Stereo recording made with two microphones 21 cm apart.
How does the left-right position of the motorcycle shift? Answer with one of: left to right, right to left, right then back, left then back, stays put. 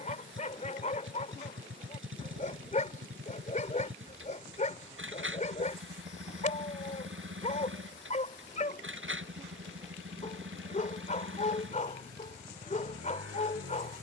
stays put.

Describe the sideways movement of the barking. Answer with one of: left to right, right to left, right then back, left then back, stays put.
stays put.